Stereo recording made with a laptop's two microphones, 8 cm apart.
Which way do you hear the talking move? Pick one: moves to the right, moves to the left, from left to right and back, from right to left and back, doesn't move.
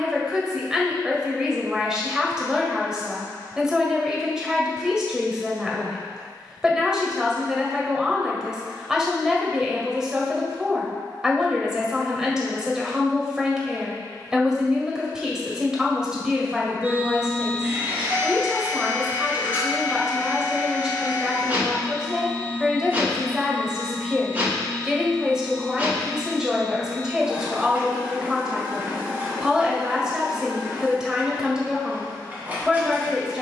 doesn't move.